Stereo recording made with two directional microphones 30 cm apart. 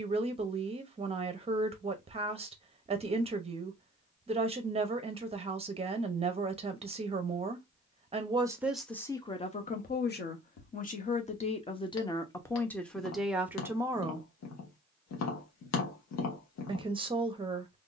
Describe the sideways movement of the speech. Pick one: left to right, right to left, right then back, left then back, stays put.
left then back.